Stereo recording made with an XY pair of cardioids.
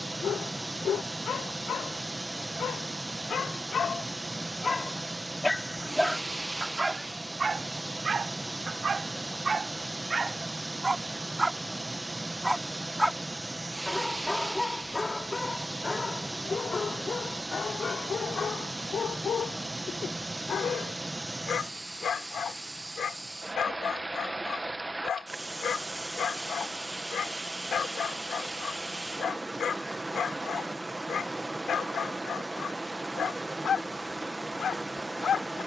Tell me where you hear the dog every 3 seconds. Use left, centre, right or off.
left, left, right, right, centre, left, left, left, left, left, left, left.